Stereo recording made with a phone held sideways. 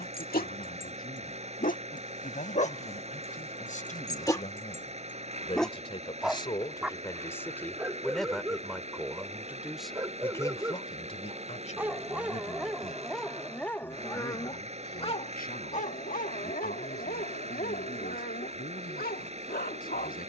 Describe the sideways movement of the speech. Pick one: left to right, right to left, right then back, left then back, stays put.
right then back.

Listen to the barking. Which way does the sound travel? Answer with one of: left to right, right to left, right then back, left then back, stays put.
right then back.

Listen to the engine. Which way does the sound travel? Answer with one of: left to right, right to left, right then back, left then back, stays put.
stays put.